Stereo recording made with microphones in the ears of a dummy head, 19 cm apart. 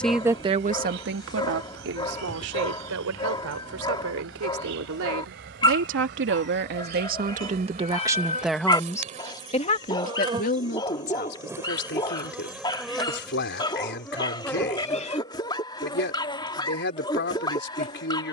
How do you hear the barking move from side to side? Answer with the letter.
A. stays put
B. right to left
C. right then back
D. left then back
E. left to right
A.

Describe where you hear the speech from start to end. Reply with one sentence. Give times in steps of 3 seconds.
You can hear the speech on the right from 0 s and on the left from 9 s.